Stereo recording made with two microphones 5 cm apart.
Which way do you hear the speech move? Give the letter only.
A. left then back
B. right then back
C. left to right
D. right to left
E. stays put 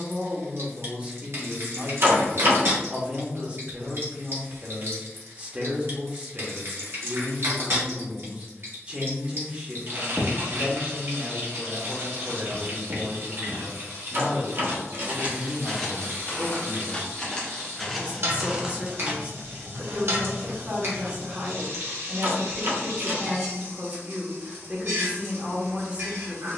E.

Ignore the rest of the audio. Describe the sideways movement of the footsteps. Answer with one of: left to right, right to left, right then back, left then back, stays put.
left then back.